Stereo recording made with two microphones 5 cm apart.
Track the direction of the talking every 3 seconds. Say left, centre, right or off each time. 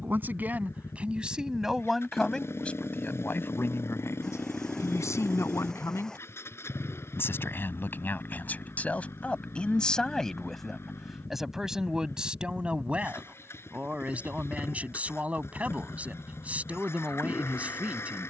centre, left, left, centre, right, right.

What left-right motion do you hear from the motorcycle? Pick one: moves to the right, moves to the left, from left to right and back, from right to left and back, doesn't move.
doesn't move.